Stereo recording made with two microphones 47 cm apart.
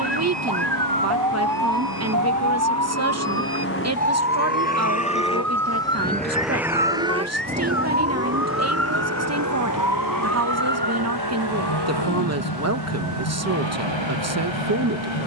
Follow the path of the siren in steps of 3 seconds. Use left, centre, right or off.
right, centre, left, left, left.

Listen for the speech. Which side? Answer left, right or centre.
right.